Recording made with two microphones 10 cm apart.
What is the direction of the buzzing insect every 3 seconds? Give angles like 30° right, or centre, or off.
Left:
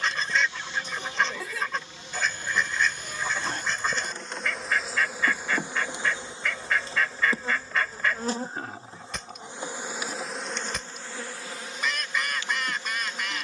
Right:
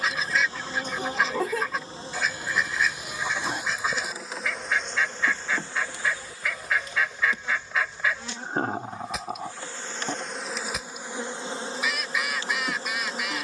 40° right, centre, 30° left, centre, 40° right.